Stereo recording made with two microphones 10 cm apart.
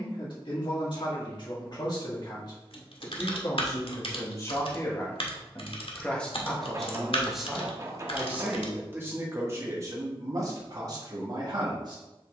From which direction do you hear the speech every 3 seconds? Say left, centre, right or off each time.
left, left, centre, right.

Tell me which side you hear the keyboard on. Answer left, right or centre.
left.